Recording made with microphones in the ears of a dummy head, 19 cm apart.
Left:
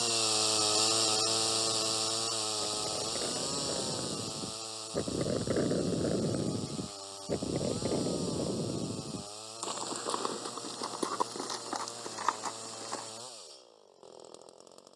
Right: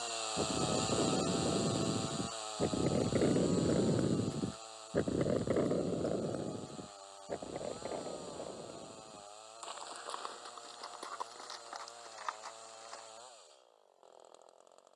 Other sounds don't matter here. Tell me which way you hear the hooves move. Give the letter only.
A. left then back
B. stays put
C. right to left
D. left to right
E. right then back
C.